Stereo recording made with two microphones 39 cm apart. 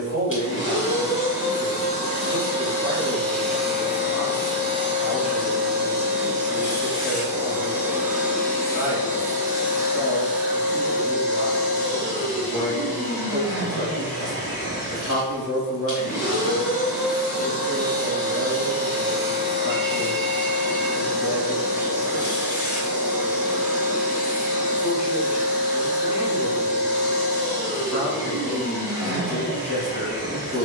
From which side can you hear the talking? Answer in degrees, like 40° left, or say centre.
40° left.